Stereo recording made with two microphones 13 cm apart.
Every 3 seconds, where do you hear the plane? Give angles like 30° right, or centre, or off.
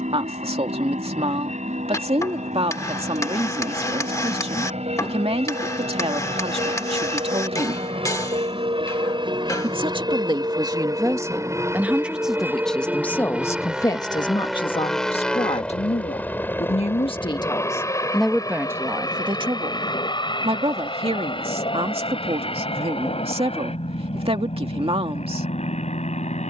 70° right, 60° right, 50° right, 30° right, 10° right, 10° left, 30° left, 40° left, 50° left.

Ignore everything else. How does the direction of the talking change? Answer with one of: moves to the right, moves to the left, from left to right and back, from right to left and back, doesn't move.
from right to left and back.